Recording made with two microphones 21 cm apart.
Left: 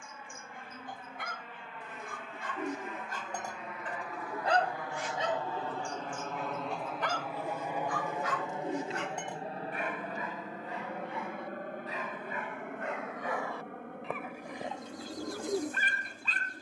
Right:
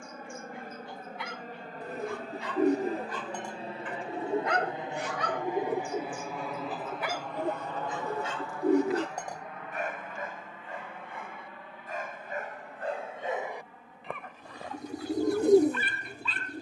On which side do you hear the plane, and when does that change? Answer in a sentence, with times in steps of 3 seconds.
In this clip you hear the plane on the right from 0 s, in the centre from 6 s and on the left from 9 s.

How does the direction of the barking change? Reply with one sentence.
You can hear the barking go right and come back.